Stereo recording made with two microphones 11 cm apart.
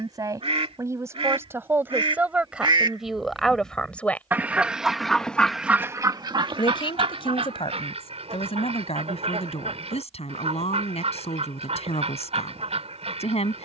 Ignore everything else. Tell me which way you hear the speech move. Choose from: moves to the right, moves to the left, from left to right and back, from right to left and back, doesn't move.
moves to the left.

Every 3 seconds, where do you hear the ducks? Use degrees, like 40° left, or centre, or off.
60° right, 20° right, 60° right, 70° right, 70° right.